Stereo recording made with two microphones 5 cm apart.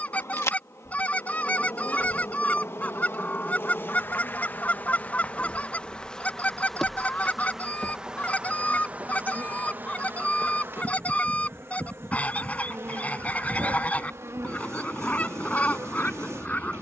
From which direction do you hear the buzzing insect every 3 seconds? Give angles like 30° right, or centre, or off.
60° left, 40° left, 10° right, 40° right, 60° right, 60° right.